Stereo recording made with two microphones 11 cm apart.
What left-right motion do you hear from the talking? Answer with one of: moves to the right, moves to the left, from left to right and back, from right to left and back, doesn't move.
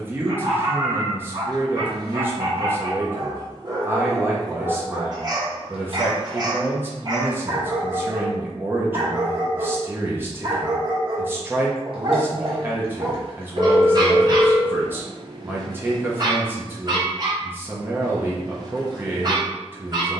doesn't move.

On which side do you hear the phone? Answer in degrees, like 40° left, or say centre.
60° right.